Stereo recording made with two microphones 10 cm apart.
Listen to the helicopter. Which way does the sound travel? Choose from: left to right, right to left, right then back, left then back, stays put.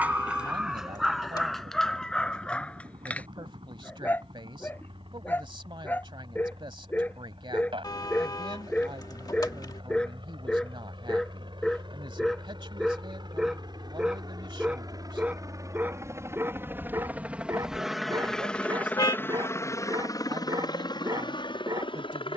right to left.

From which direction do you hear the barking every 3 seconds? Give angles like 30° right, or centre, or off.
centre, 20° left, 20° left, 10° left, centre, 20° right, 40° right, 40° right.